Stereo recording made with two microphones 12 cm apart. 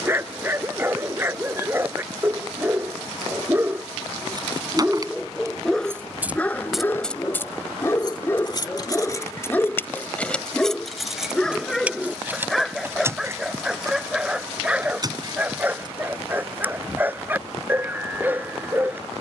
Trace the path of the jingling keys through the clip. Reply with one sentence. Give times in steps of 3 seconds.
In this clip you hear the jingling keys not at all from 0 s, on the right from 3 s, on the left from 6 s, in the centre from 9 s, on the right from 12 s and not at all from 18 s.